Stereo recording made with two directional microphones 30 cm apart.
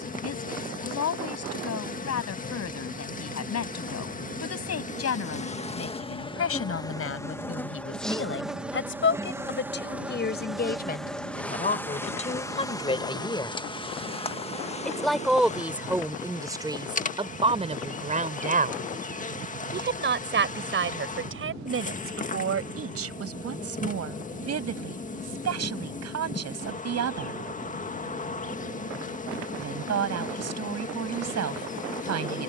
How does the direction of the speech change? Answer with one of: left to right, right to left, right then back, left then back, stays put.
left to right.